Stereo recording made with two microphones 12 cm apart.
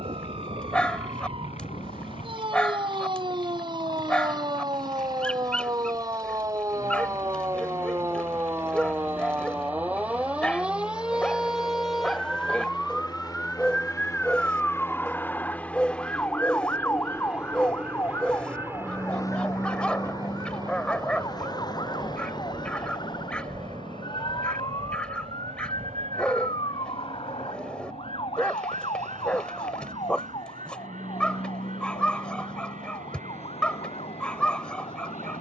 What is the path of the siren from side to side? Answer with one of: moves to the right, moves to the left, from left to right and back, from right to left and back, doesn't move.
moves to the left.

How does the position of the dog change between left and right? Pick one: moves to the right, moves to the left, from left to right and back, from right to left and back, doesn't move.
doesn't move.